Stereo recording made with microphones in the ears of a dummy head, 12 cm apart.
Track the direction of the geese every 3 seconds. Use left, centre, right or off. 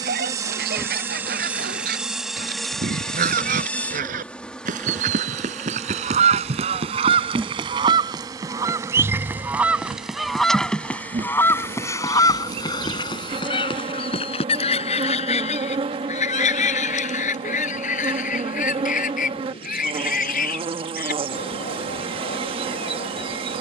right, right, right, centre, left, left, left, left.